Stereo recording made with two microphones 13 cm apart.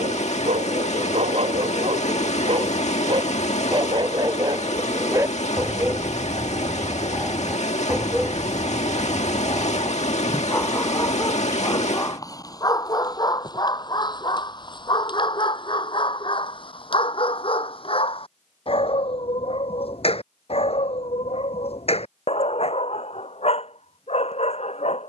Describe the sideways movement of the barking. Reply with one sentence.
You can hear the barking move to the left.